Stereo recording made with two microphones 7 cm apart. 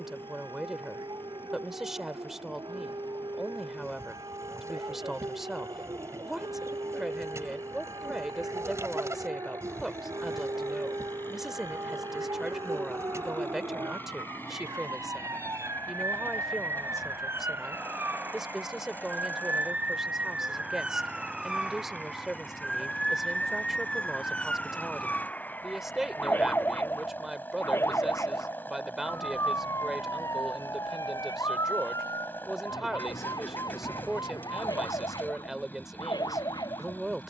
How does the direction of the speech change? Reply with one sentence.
In this clip you hear the speech stay put.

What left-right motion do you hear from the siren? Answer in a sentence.
You can hear the siren travel towards the left.